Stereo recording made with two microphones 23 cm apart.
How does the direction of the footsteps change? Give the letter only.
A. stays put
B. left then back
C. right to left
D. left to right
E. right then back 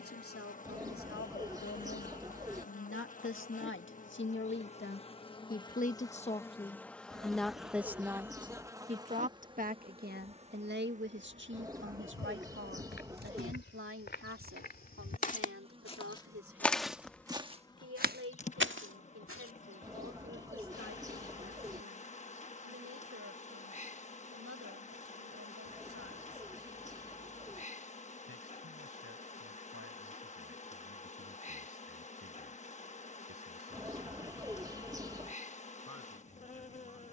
D.